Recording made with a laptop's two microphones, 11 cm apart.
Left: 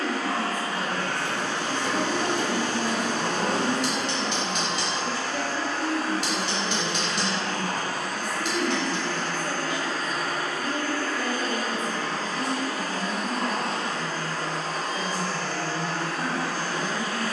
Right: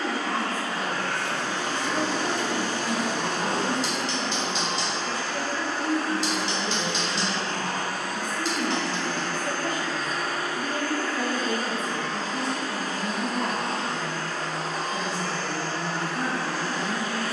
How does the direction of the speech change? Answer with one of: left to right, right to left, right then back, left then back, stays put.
left to right.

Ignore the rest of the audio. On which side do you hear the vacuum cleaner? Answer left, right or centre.
left.